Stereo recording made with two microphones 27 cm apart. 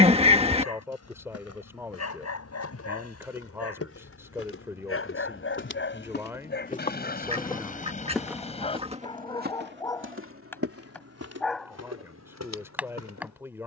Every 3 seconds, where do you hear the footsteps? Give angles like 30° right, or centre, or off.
60° left, 50° left, 10° left, 50° right, 70° right.